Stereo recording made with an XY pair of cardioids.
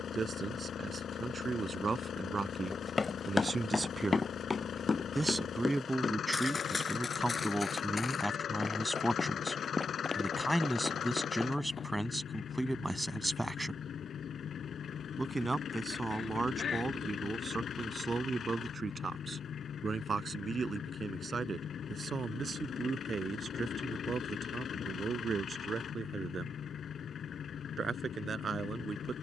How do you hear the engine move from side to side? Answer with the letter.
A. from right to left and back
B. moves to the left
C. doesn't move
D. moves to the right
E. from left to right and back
C.